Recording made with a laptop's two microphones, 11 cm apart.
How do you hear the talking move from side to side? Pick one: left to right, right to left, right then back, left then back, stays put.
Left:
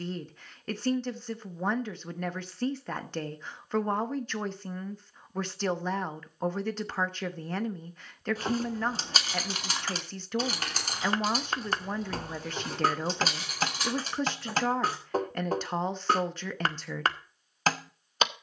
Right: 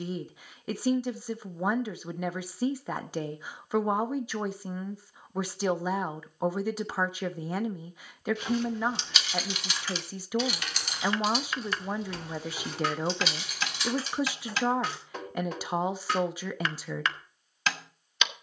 stays put.